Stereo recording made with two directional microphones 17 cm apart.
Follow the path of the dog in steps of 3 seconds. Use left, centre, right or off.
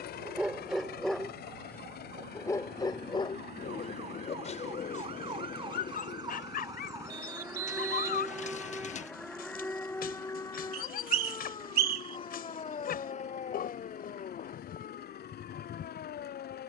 centre, left, left, left, left, left.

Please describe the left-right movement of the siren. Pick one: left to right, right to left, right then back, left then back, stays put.
right to left.